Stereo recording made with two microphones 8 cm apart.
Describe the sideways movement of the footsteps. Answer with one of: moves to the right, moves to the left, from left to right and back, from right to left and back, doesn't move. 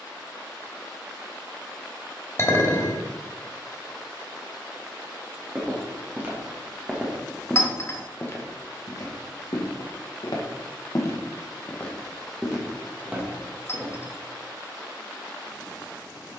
from right to left and back.